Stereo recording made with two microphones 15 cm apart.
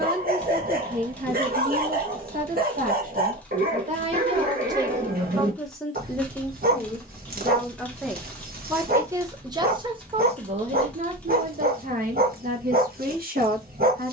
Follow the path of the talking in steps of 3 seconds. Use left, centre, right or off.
right, right, centre, right, right.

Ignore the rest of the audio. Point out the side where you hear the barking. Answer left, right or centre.
right.